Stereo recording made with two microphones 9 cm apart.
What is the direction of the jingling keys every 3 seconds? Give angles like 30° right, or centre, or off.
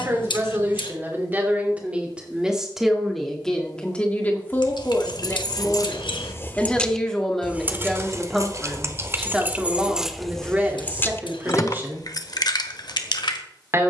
off, 60° left, 10° right, centre, 60° left.